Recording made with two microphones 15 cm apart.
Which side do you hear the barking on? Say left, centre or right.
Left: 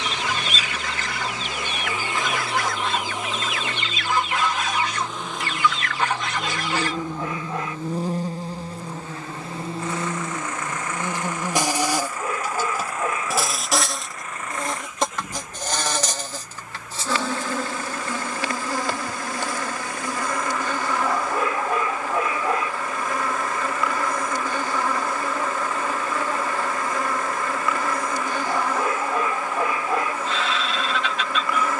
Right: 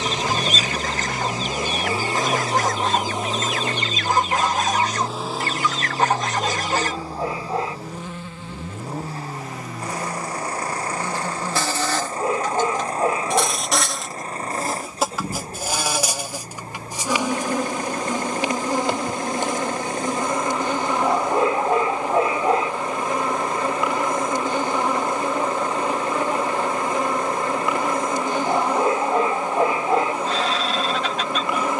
right.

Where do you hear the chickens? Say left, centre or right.
right.